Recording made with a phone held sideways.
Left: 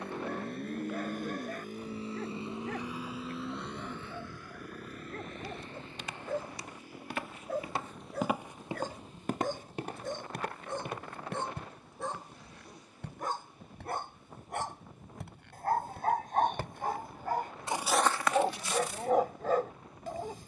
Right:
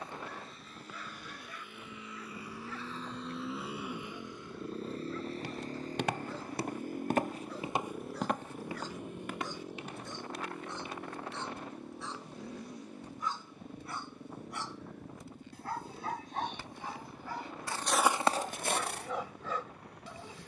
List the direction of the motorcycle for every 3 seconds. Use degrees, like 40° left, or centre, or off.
40° left, 20° right, 50° right, 60° right, 60° right, 70° right, 70° right.